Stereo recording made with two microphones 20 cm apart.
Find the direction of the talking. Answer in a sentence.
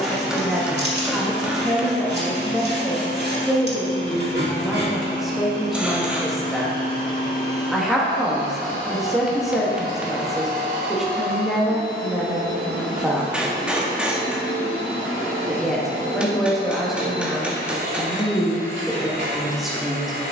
You can hear the talking in the centre.